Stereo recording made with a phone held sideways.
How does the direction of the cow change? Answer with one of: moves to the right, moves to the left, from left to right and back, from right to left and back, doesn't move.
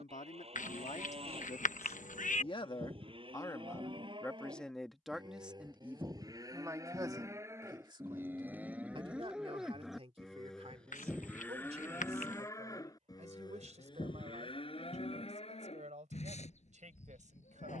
moves to the left.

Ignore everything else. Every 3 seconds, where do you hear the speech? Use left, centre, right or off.
left, centre, right, right, right, right.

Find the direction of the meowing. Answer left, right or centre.
left.